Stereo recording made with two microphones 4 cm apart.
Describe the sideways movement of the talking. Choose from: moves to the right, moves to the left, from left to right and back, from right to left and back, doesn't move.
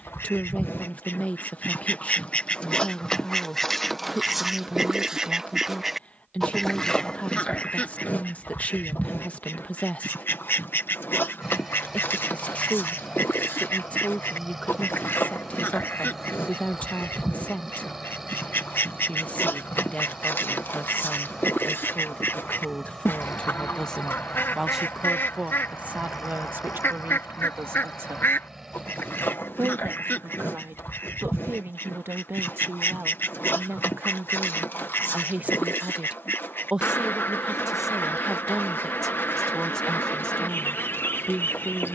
from left to right and back.